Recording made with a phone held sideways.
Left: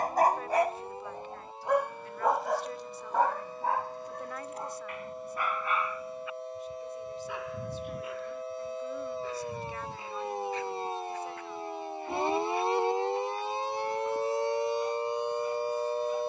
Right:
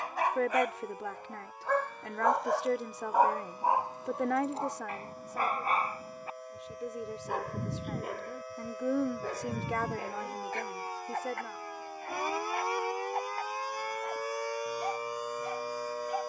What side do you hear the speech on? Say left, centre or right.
right.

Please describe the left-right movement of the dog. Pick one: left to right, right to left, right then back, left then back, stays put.
left to right.